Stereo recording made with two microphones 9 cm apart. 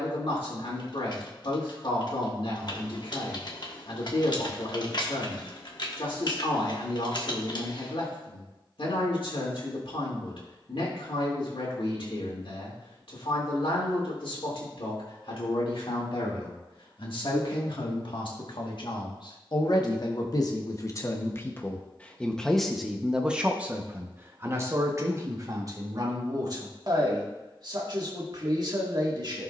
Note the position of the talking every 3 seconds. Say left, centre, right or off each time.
left, left, left, left, left, left, left, centre, right, right.